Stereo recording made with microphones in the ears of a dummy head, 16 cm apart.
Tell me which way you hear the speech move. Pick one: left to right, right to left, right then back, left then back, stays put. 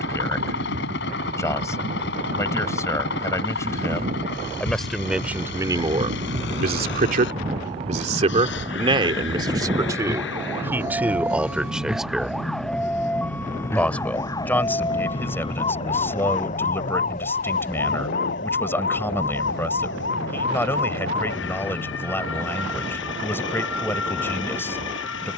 right then back.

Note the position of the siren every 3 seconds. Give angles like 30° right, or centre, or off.
50° right, 40° right, 30° right, 10° right, 10° left, 40° left, 50° left, 70° left, 70° left.